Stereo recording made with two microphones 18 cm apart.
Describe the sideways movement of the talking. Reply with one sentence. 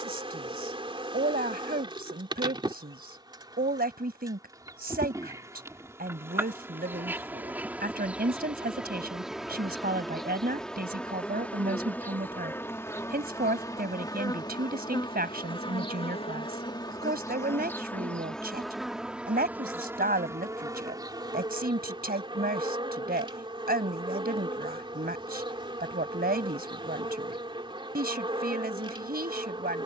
In this clip you hear the talking stay put.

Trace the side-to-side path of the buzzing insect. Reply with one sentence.
In this clip you hear the buzzing insect go left and come back.